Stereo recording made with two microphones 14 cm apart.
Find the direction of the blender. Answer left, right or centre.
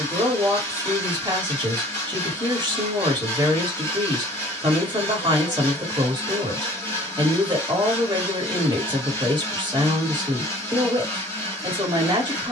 left.